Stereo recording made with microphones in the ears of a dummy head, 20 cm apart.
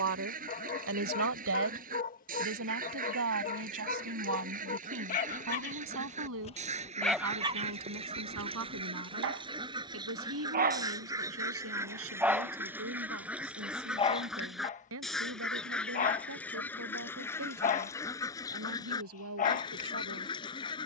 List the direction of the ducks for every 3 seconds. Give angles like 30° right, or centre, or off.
40° right, 30° right, 30° right, 20° right, 10° right, 10° left, 20° left.